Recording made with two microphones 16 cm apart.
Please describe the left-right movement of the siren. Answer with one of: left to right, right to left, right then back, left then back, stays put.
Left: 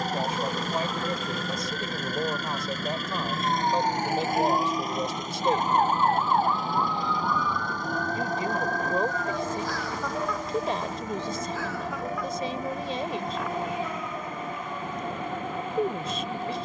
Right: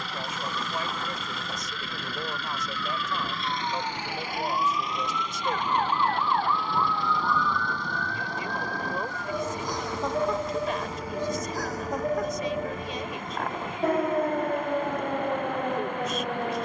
left to right.